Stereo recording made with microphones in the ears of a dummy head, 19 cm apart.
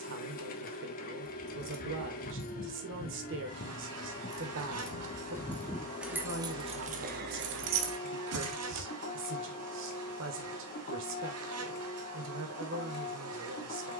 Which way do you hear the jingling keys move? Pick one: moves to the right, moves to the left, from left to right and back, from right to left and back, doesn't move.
moves to the right.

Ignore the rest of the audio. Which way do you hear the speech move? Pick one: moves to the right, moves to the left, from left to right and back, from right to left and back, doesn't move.
doesn't move.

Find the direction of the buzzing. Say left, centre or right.
right.